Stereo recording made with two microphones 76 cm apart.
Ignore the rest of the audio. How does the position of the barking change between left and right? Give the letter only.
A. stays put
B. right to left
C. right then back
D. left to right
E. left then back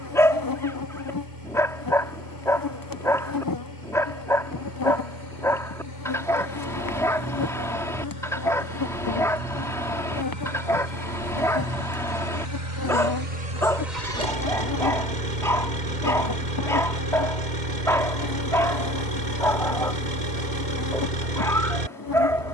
A.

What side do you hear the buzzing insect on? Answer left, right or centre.
left.